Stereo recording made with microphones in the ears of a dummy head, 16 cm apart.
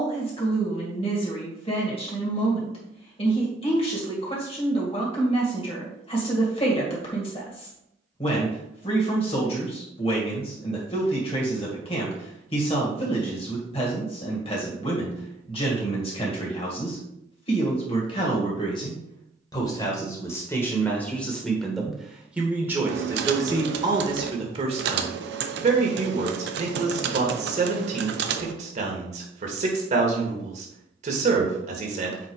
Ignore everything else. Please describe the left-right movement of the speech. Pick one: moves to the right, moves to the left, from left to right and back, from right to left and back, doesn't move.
moves to the right.